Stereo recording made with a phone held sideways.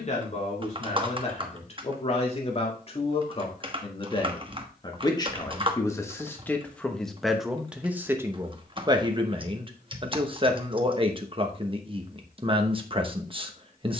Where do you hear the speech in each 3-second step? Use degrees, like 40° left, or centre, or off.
40° left, 30° left, centre, 30° right, 30° right.